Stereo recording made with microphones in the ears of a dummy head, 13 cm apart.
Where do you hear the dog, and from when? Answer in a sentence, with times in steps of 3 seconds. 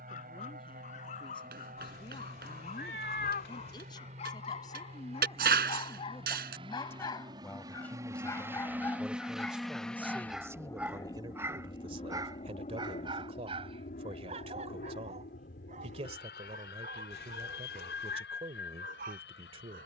In this clip you hear the dog on the left from 0 s, in the centre from 9 s and on the right from 12 s.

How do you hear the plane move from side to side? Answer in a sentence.
You can hear the plane move from right to left.